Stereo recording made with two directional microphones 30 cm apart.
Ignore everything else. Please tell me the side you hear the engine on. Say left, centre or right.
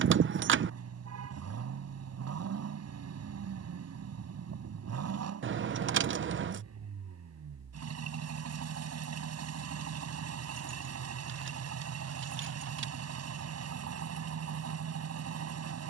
right.